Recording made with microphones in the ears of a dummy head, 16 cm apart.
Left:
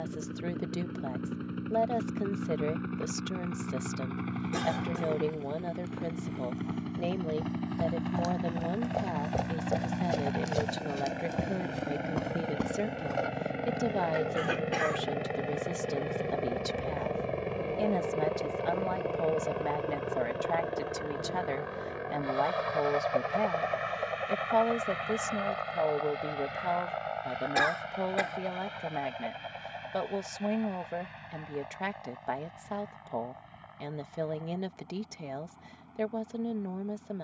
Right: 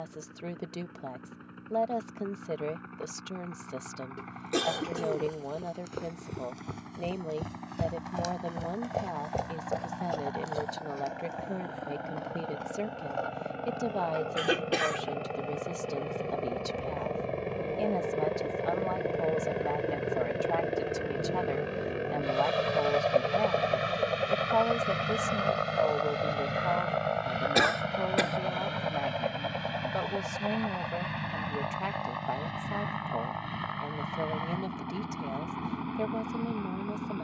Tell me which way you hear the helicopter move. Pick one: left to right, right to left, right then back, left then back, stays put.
left to right.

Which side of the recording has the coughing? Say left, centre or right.
right.